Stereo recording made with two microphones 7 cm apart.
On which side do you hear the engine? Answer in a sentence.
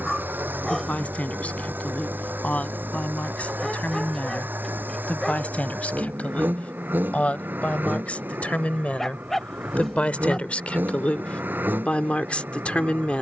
In this clip you hear the engine on the right.